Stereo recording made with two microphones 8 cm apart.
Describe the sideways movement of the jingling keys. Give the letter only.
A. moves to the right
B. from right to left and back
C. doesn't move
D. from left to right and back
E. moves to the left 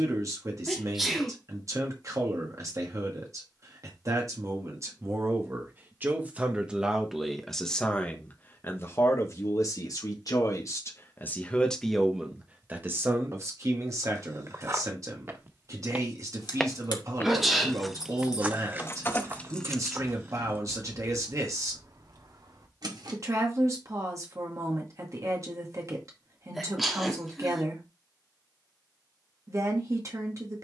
A.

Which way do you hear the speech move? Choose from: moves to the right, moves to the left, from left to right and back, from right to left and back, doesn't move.
from right to left and back.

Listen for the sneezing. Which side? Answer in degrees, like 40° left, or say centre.
centre.